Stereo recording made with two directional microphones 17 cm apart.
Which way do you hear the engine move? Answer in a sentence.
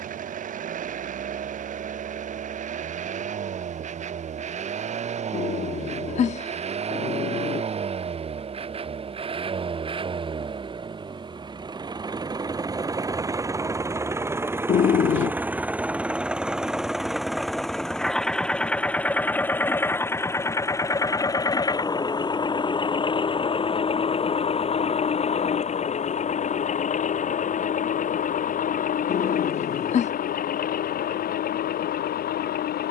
You can hear the engine move from right to left.